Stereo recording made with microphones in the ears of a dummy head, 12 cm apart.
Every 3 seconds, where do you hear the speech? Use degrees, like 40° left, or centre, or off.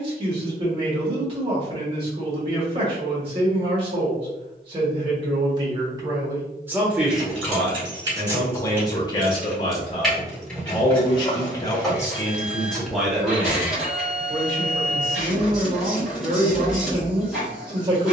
40° right, 40° right, centre, 40° left, 10° right, 40° right.